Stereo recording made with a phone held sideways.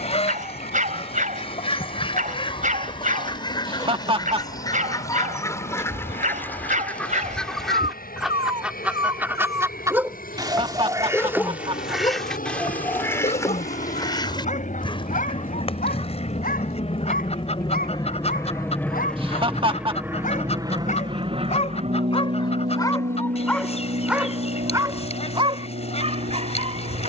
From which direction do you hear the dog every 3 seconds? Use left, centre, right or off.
right, right, right, centre, left, left, left, left, right.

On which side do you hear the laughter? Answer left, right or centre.
right.